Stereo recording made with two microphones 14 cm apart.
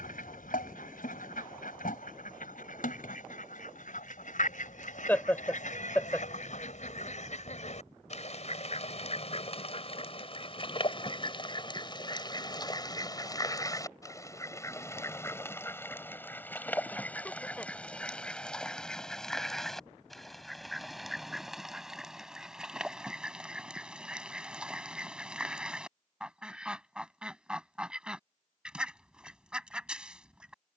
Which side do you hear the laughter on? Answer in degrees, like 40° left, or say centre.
10° left.